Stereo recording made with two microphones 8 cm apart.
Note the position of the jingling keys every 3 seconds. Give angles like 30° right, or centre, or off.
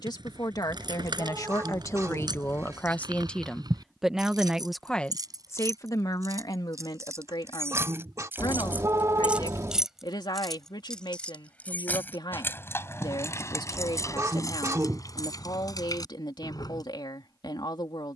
70° right, 60° right, 40° right, centre, 40° left, 50° left.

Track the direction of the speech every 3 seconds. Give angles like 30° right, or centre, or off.
50° left, 10° left, 70° left, 70° left, 70° left, 70° left.